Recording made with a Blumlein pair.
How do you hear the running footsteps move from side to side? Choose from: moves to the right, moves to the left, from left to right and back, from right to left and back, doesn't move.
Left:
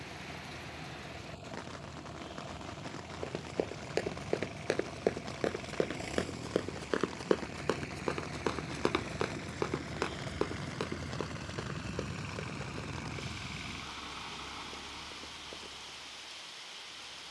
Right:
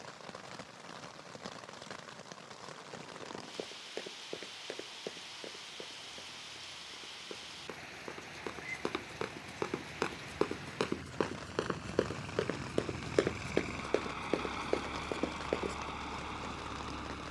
moves to the right.